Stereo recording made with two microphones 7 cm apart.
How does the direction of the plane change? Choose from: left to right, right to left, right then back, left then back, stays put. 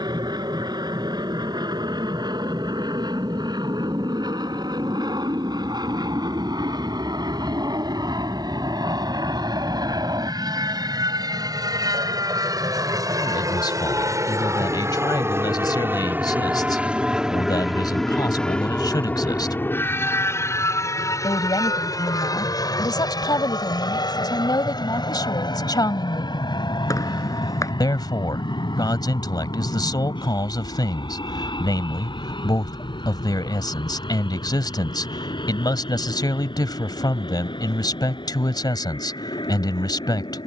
right to left.